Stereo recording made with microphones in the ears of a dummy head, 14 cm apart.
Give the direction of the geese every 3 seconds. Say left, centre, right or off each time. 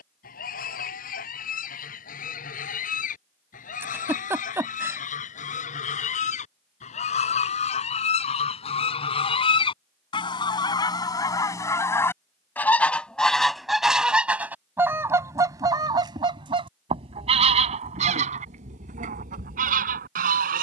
left, left, left, left, centre, right, right.